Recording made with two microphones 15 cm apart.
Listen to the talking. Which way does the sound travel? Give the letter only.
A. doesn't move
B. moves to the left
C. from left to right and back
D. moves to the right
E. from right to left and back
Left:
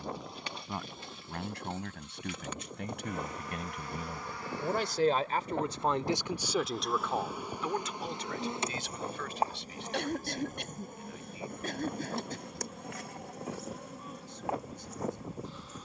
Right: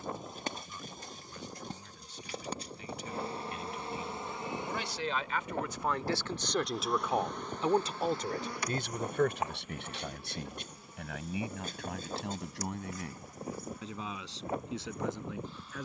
D.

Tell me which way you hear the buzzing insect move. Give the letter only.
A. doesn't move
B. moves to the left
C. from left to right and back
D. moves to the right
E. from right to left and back
B.